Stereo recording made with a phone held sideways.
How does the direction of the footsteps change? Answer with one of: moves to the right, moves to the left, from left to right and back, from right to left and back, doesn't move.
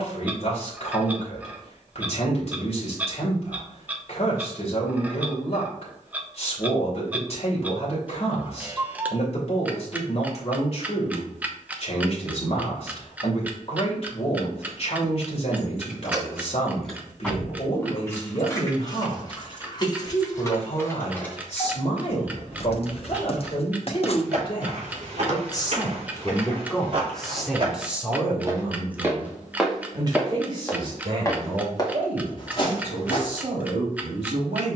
moves to the left.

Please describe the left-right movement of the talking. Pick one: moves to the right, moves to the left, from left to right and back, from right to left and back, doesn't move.
moves to the right.